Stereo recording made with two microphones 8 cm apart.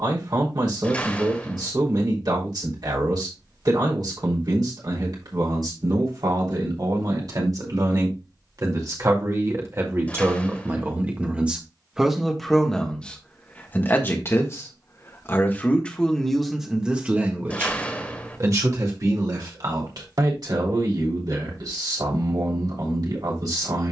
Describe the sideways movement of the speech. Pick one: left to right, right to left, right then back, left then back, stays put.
left then back.